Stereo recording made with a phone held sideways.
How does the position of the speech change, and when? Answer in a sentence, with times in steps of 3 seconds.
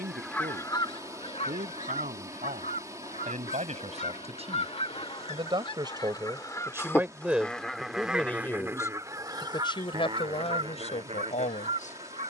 In this clip you hear the speech on the right from 0 s, in the centre from 6 s and on the left from 9 s.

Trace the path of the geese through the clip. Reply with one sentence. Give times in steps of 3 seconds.
You can hear the geese on the left from 0 s, in the centre from 6 s and on the right from 9 s.